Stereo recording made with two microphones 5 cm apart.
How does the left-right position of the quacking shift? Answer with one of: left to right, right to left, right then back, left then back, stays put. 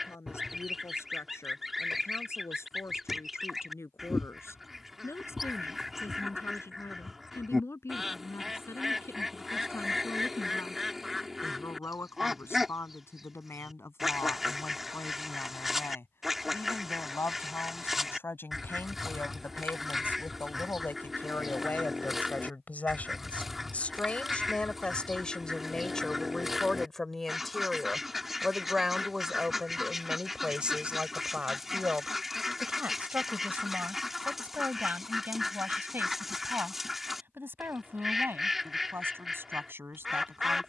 stays put.